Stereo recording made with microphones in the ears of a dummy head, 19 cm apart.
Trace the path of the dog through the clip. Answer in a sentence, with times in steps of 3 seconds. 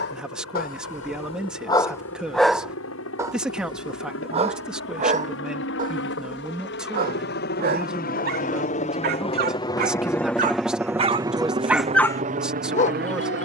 You can hear the dog on the left from 0 s, on the right from 3 s and on the left from 12 s.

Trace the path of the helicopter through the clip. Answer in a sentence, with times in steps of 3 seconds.
In this clip you hear the helicopter on the left from 0 s, in the centre from 9 s and on the right from 12 s.